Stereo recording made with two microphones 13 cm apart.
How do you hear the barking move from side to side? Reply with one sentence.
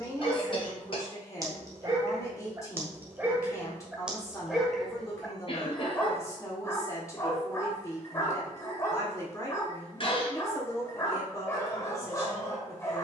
You can hear the barking travel towards the left.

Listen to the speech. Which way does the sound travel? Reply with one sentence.
In this clip you hear the speech stay in one place.